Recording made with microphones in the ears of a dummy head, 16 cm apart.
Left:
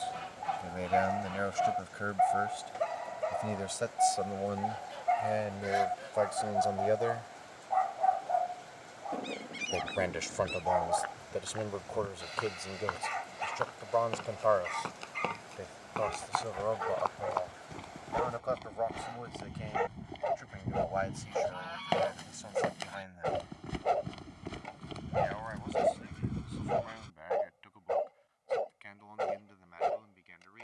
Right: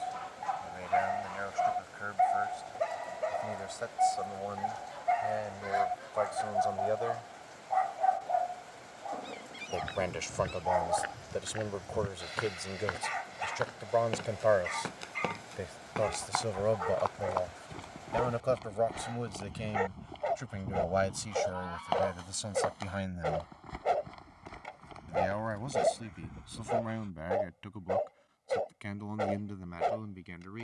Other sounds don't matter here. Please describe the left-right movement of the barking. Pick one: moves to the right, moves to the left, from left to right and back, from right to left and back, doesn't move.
doesn't move.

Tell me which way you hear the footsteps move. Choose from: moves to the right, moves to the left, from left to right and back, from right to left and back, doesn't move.
moves to the left.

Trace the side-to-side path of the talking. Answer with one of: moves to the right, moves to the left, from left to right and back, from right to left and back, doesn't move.
moves to the right.